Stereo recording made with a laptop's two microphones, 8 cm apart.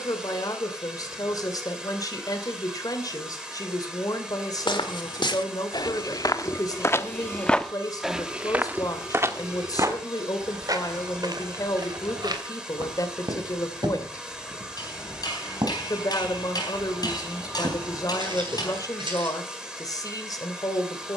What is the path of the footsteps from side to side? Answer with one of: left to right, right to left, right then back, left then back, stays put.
left to right.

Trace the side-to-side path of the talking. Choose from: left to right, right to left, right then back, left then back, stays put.
stays put.